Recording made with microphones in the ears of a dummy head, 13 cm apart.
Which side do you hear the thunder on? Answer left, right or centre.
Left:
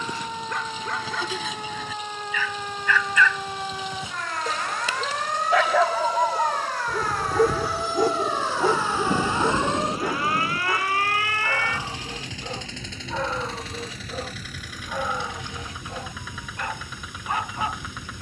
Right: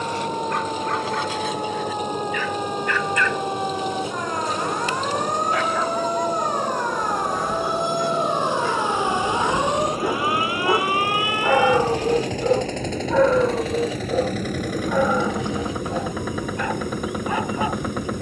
left.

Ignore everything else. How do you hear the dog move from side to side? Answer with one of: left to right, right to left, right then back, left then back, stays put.
left to right.